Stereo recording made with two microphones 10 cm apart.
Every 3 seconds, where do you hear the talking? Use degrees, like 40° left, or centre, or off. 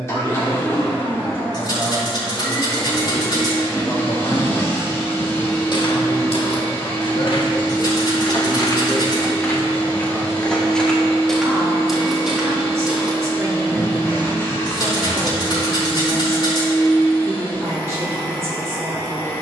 20° right, 50° left, 50° left, centre, 30° right, 30° right, 30° right.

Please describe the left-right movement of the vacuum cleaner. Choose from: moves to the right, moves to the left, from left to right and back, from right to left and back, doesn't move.
doesn't move.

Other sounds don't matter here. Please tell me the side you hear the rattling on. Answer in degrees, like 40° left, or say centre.
50° left.